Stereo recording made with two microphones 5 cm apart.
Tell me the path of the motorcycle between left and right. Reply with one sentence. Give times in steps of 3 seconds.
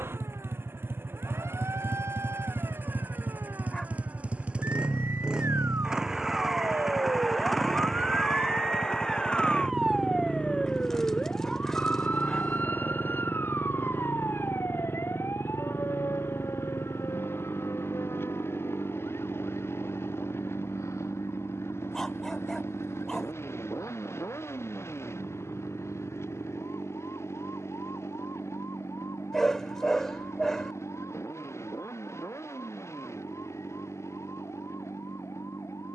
In this clip you hear the motorcycle on the right from 0 s, in the centre from 6 s and on the left from 9 s.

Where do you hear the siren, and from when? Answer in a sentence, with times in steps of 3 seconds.
In this clip you hear the siren on the right from 0 s, in the centre from 9 s and on the left from 12 s.